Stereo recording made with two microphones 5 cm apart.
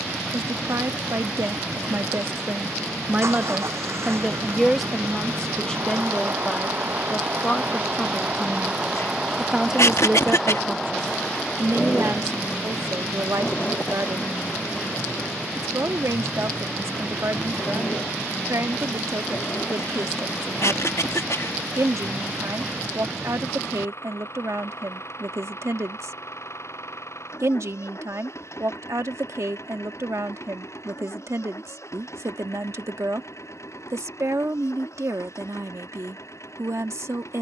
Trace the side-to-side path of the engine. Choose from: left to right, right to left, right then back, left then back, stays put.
right to left.